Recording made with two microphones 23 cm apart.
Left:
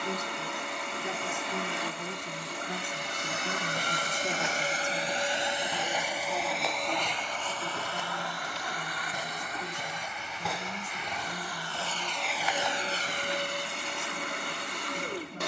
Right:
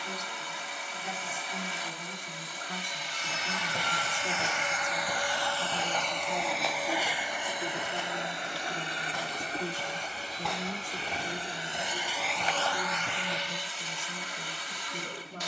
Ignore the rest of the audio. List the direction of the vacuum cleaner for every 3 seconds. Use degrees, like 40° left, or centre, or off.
60° left, 40° left, 10° right, 30° right, 40° left.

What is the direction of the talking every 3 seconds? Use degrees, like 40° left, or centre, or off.
40° left, 20° left, 20° right, 40° right, 50° right.